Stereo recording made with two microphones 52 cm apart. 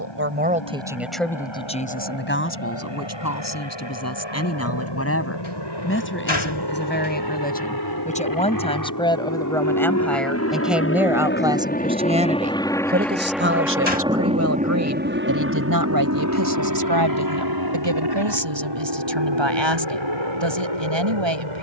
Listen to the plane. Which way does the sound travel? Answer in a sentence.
In this clip you hear the plane move to the right.